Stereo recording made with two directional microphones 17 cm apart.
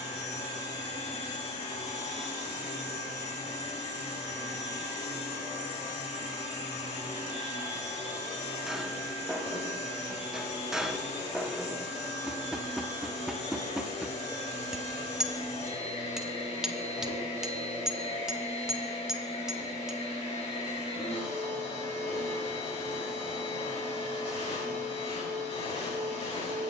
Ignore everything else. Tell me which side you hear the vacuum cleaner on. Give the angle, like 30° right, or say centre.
40° left.